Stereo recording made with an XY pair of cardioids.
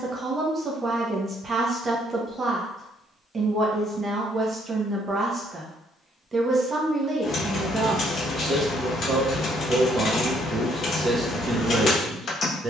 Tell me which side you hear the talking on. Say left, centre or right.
right.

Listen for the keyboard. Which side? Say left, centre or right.
left.